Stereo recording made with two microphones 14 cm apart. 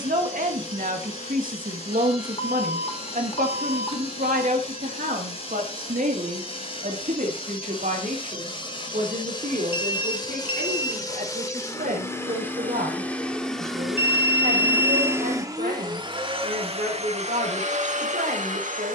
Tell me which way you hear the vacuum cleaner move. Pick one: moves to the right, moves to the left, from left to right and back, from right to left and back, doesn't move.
moves to the right.